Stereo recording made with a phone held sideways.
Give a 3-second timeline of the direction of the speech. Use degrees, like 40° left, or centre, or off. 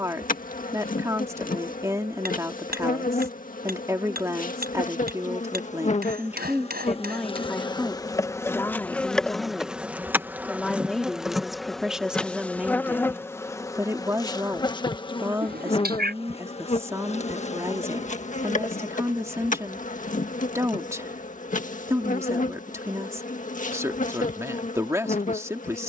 20° right, 20° right, centre, centre, 10° right, 20° right, 20° right, 20° right, 20° right.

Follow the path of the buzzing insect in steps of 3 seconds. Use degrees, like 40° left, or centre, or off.
60° left, 60° left, 30° left, centre, 20° left, 40° left, 50° left, 50° left, 50° left.